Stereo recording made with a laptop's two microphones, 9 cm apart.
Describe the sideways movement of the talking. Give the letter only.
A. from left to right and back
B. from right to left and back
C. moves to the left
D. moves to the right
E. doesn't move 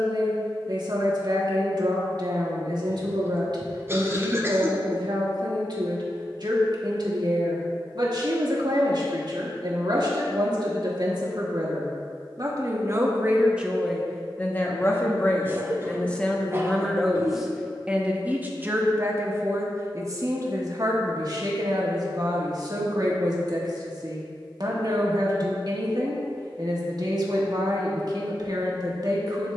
B.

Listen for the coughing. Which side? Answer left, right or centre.
right.